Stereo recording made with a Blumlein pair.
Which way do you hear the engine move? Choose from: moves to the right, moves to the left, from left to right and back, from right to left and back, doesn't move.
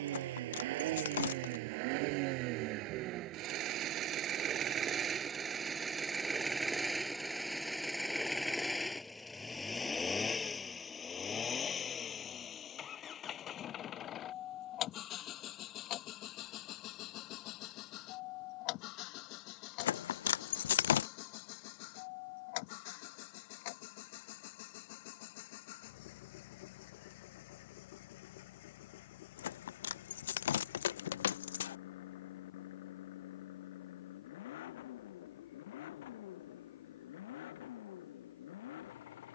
moves to the left.